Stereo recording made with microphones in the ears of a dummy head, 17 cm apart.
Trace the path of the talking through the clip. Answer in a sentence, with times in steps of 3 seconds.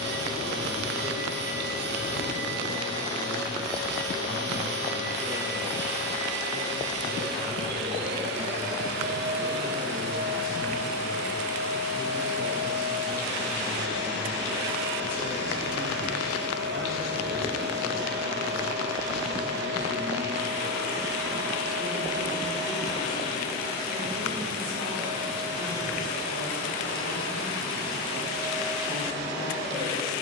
In this clip you hear the talking on the left from 0 s, in the centre from 12 s and on the right from 15 s.